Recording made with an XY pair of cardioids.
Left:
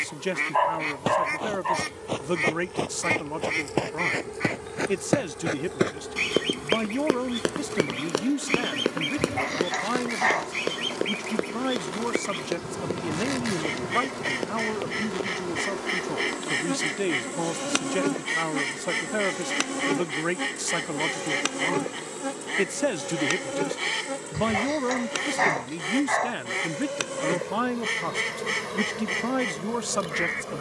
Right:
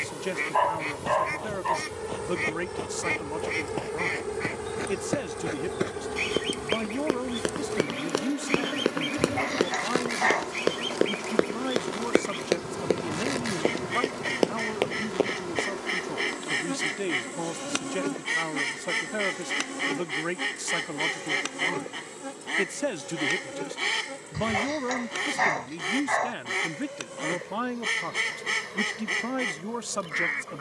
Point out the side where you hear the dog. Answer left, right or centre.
centre.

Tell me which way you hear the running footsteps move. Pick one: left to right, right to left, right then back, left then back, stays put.
left to right.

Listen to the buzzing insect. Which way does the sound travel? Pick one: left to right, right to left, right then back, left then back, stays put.
right to left.